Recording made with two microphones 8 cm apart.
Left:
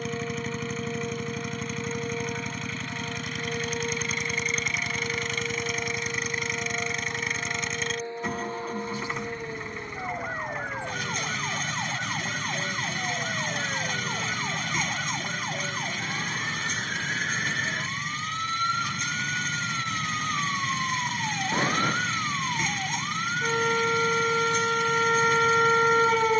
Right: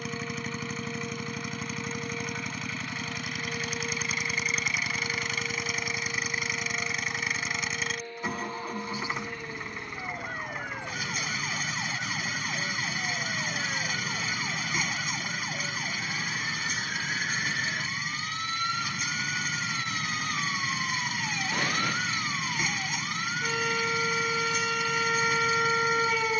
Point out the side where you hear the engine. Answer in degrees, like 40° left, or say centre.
centre.